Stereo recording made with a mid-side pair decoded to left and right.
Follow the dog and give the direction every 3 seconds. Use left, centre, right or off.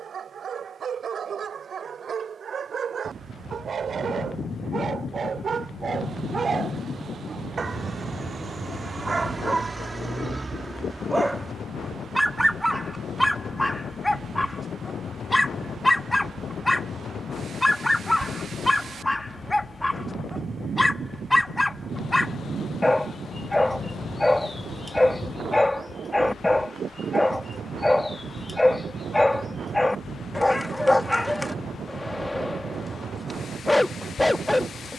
right, right, right, right, centre, centre, centre, centre, centre, centre, centre, centre.